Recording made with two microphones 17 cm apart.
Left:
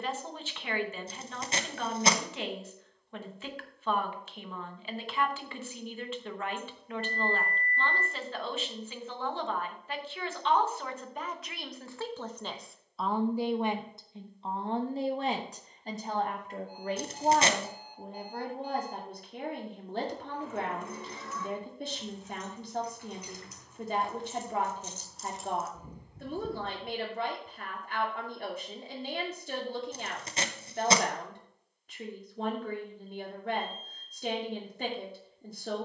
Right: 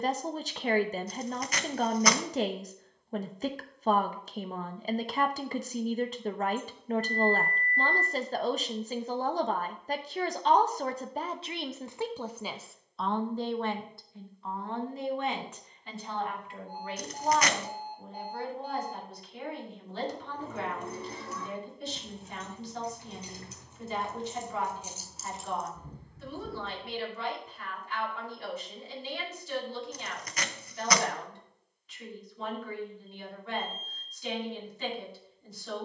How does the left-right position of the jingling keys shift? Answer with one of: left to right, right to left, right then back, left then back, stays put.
right to left.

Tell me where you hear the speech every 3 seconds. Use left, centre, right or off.
right, right, right, right, centre, left, left, left, left, left, left, left.